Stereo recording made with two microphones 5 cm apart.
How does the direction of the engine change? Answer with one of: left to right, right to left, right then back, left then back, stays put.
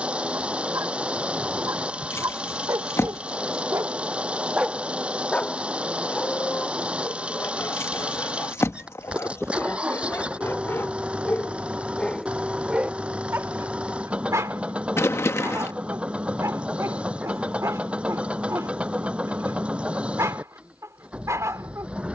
stays put.